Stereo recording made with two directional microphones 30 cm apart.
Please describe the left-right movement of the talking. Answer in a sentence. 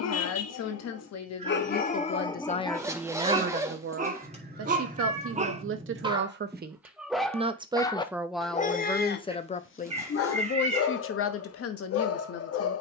You can hear the talking go right and come back.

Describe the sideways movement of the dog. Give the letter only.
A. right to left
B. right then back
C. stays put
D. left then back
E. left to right
B.